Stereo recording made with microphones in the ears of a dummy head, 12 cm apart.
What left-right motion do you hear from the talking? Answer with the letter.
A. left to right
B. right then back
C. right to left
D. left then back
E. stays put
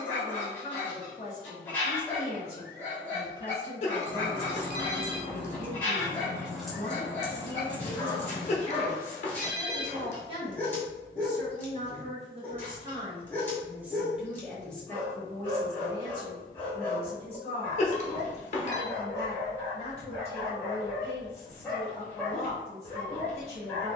B.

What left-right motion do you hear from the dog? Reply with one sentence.
In this clip you hear the dog stay put.